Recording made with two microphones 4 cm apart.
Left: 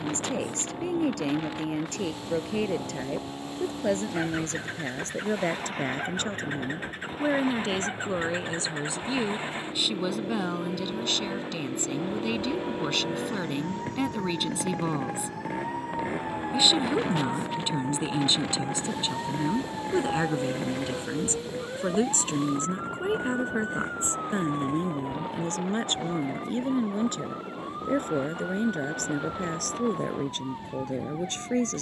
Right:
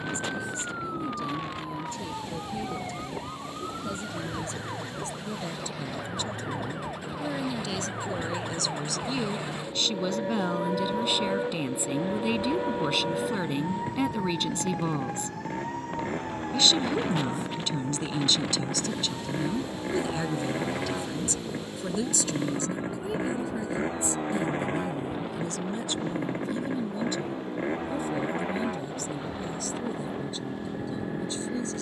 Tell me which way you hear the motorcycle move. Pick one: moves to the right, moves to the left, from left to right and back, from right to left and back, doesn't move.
moves to the right.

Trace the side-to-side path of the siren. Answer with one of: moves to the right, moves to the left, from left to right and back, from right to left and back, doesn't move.
moves to the left.